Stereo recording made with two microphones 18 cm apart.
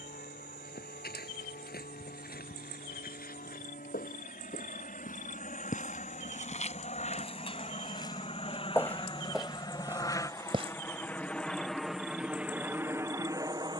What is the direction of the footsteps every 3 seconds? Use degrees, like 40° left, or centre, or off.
60° left, 50° left, 30° left, 10° right, off.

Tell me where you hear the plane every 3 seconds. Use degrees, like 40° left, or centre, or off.
60° left, 50° left, 40° left, 10° left, 10° right.